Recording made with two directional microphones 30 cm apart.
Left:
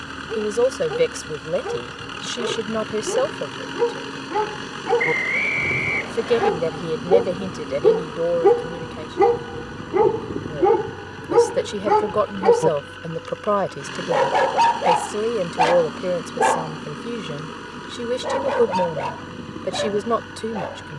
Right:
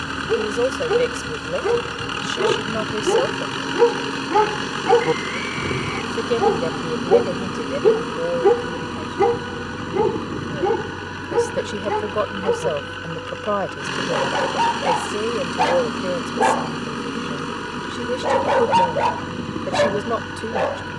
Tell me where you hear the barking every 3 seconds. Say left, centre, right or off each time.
right, right, centre, left, left, centre, right.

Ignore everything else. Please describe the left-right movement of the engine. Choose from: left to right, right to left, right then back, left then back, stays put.
stays put.